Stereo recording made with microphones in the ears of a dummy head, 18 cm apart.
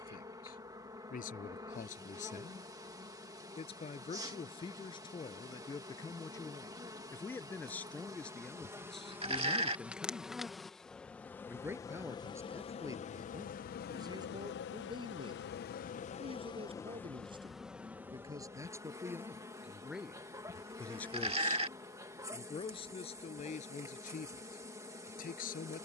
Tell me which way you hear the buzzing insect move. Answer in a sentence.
You can hear the buzzing insect go left and come back.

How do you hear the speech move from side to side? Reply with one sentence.
In this clip you hear the speech move from left to right and back again.